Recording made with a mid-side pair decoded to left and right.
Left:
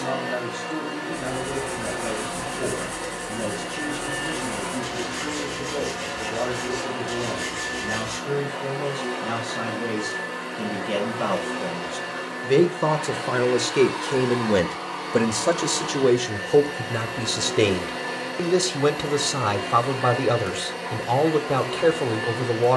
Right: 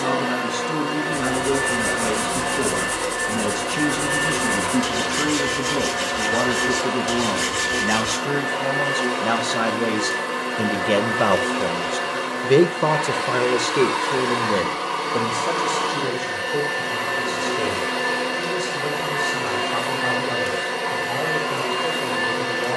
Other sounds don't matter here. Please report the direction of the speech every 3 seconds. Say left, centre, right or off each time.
right, right, right, right, centre, left, left, left.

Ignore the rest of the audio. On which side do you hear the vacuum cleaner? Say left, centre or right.
right.